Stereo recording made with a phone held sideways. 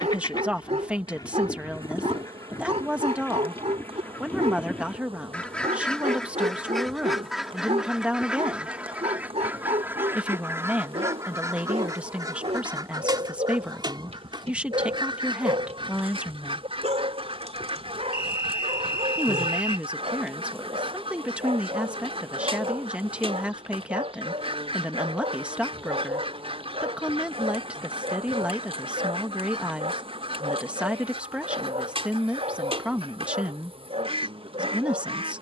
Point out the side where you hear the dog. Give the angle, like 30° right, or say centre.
50° right.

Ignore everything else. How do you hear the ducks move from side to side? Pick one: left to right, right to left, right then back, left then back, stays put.
left to right.